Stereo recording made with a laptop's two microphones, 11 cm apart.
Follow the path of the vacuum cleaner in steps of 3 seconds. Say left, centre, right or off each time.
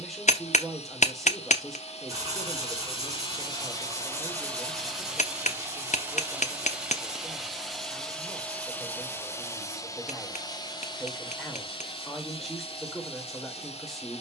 left, centre, centre, left, left.